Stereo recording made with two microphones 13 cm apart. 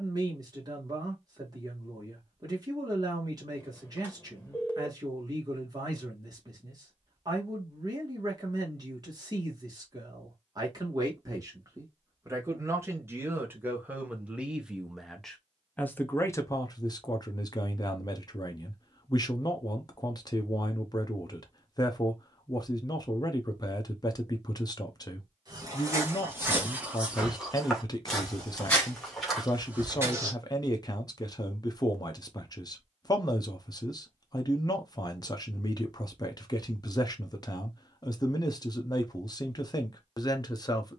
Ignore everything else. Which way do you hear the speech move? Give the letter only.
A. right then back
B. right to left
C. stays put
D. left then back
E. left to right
B.